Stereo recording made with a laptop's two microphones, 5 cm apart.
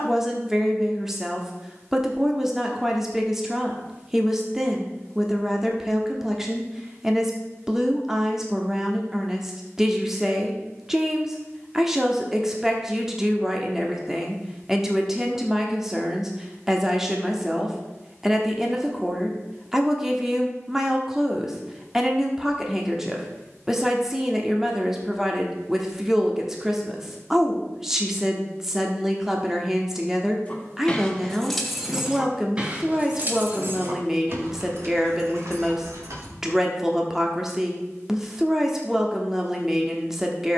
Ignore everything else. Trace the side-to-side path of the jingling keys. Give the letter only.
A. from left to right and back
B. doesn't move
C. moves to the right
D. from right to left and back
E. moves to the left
C.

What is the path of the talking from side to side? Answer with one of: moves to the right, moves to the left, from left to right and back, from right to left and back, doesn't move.
doesn't move.